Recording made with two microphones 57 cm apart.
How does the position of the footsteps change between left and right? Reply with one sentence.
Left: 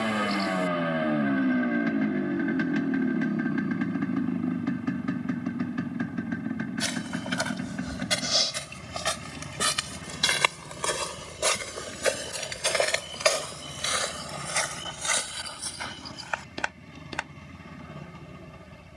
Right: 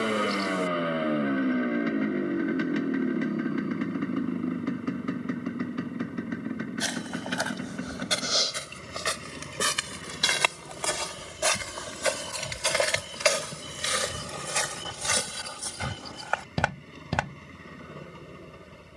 You can hear the footsteps move to the right.